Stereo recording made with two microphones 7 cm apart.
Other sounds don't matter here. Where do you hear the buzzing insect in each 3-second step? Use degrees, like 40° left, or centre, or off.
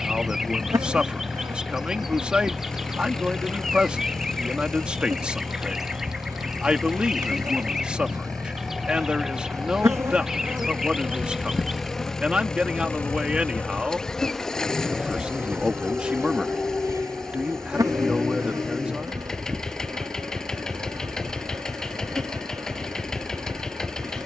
50° right, 50° right, 50° right, 30° right, 10° left, 40° right, 50° right, 50° right.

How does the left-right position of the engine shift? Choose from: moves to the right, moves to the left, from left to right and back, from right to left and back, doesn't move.
doesn't move.